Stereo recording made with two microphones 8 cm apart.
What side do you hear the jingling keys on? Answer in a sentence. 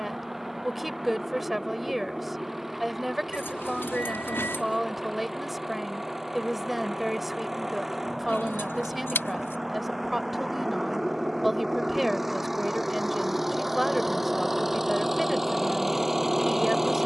You can hear the jingling keys on the left.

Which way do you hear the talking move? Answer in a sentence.
You can hear the talking stay put.